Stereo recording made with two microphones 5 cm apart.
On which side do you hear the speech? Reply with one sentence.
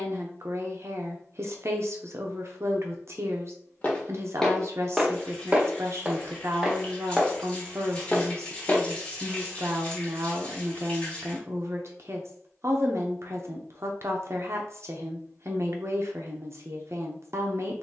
You can hear the speech on the right.